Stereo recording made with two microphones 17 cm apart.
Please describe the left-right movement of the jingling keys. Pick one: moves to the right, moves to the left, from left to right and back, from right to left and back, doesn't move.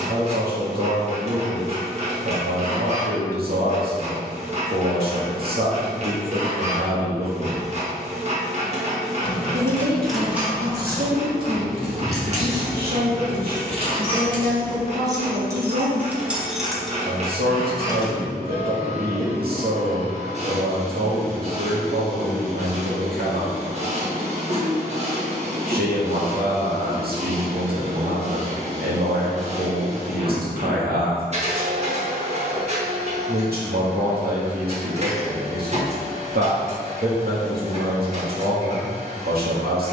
from left to right and back.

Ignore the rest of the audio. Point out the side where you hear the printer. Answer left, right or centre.
right.